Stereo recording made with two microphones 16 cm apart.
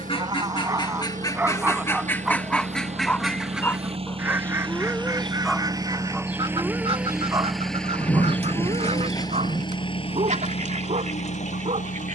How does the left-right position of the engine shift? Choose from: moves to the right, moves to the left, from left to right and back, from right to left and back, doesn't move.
moves to the left.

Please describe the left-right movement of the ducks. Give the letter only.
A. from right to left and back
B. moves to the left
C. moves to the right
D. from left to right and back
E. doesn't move
C.